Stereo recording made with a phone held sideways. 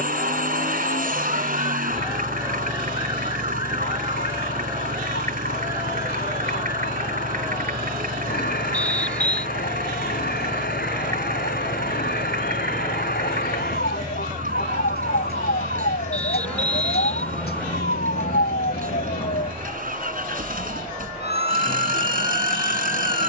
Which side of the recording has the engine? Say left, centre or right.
right.